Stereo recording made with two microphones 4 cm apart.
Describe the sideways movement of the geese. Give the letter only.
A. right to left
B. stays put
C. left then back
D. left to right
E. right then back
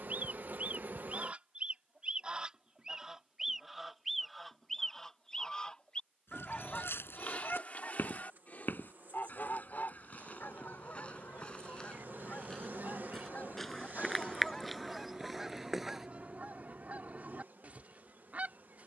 C.